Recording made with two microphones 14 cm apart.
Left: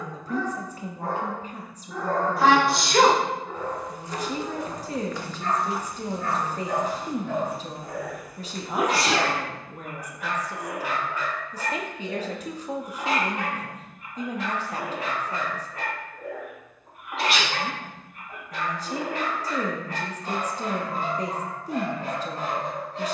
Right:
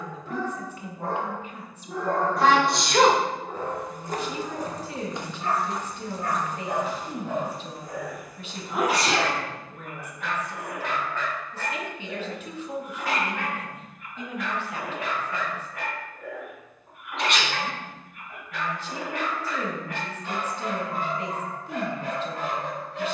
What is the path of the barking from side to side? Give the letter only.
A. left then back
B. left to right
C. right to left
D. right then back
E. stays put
C.